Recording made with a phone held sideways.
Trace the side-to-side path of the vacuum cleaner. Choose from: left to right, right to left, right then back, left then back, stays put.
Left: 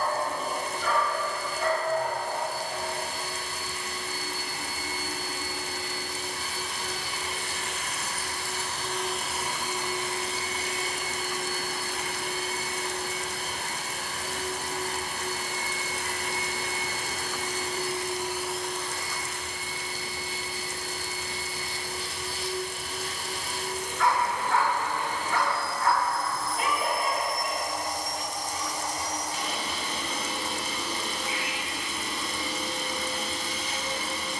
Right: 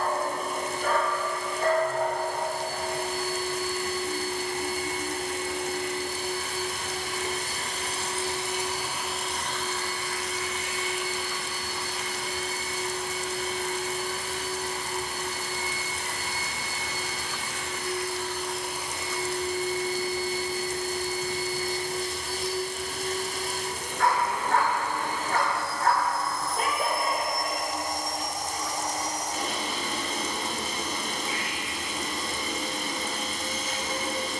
left then back.